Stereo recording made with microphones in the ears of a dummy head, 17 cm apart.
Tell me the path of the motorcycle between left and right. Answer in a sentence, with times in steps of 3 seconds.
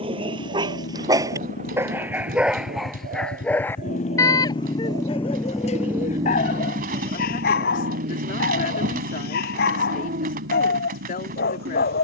You can hear the motorcycle on the left from 0 s and on the right from 6 s.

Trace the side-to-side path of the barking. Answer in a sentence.
You can hear the barking travel towards the left.